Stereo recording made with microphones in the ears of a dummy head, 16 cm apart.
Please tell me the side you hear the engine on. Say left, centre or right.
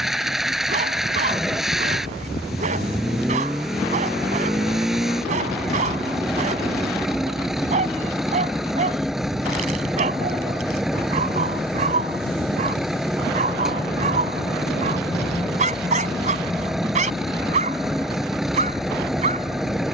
centre.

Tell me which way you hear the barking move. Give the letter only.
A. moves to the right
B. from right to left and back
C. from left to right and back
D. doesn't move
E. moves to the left
D.